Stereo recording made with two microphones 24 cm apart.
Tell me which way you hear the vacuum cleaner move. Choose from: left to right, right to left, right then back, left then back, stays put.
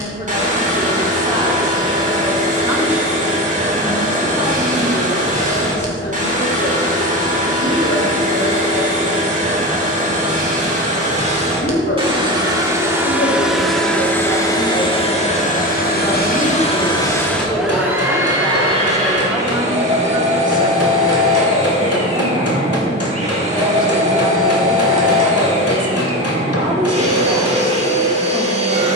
left then back.